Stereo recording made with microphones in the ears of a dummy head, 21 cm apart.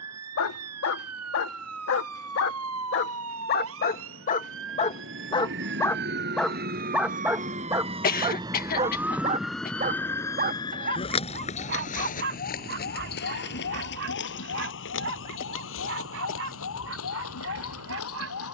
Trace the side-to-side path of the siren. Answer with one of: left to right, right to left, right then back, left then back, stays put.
right to left.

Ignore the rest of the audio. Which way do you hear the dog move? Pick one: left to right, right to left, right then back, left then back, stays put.
left to right.